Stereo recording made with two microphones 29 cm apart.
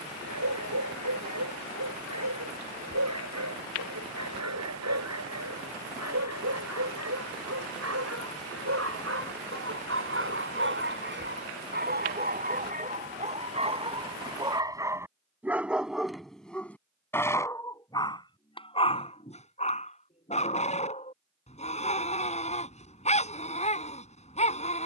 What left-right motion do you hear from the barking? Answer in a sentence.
You can hear the barking move from right to left.